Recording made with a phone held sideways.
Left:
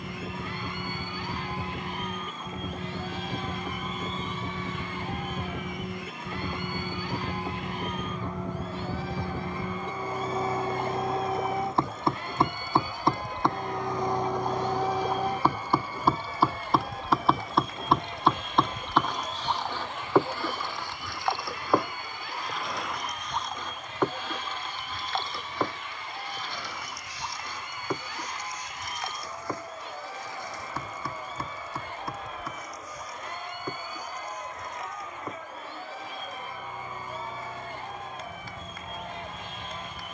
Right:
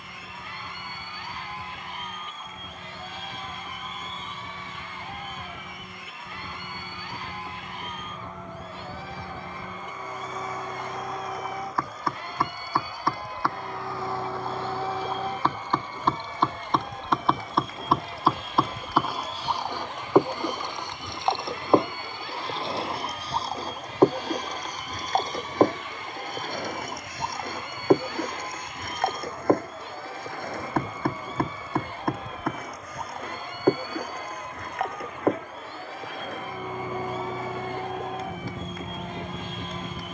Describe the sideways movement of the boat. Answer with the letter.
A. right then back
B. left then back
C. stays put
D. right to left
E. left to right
E.